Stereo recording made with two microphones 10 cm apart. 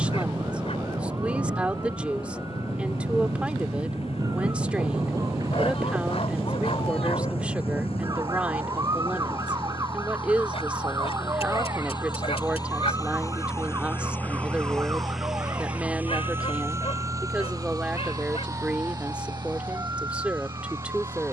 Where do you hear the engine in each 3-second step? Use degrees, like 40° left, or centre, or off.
80° left, 80° left, 70° left, 60° left, 30° left, 20° right, 50° right.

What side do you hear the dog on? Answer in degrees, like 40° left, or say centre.
80° left.